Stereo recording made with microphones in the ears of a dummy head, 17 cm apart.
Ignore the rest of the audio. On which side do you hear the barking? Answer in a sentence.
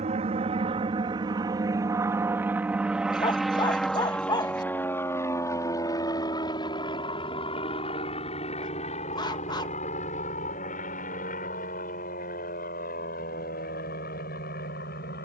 In this clip you hear the barking on the left.